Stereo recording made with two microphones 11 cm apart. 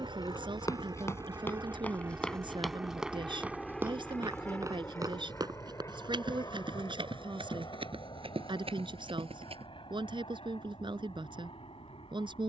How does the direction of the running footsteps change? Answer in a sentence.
You can hear the running footsteps go from the left side to the right.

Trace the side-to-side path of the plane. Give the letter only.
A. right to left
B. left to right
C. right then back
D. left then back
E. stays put
A.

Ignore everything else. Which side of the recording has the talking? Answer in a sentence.
In this clip you hear the talking on the right.